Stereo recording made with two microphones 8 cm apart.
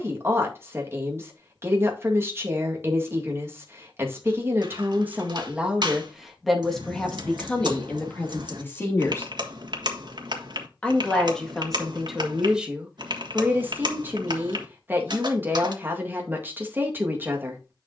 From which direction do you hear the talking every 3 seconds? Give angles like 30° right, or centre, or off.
30° right, 20° right, 10° left, 10° left, 20° right, 20° right.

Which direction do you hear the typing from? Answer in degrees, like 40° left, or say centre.
60° right.